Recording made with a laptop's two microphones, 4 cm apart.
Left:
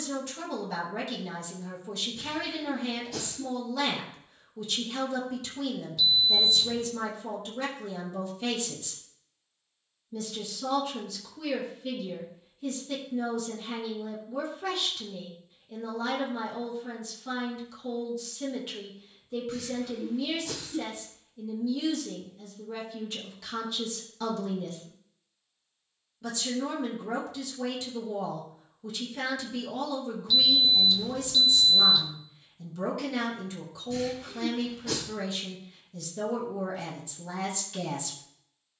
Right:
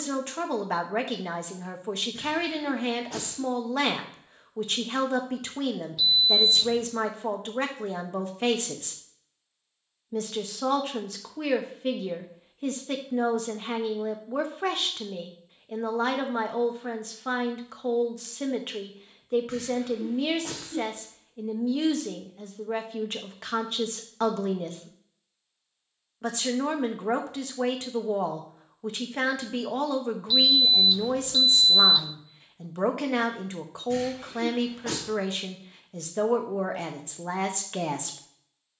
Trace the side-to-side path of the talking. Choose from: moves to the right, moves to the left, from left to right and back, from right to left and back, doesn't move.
doesn't move.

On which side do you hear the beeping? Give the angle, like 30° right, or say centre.
10° right.